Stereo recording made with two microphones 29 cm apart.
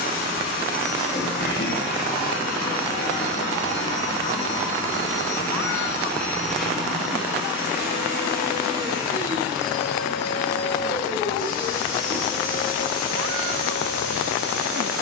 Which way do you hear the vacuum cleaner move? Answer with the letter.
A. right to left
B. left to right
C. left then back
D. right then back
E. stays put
D.